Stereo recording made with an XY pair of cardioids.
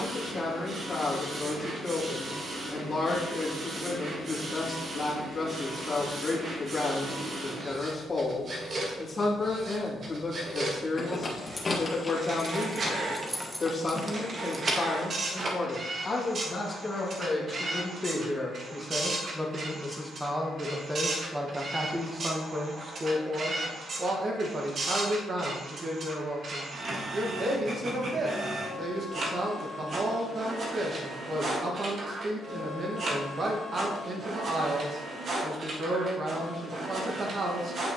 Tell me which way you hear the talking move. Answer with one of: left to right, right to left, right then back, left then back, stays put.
left to right.